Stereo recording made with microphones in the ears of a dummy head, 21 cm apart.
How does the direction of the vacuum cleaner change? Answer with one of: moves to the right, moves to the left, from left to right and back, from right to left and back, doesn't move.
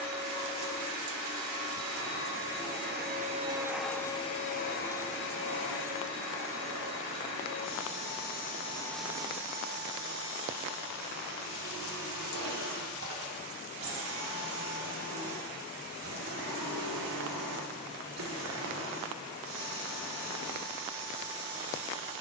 from right to left and back.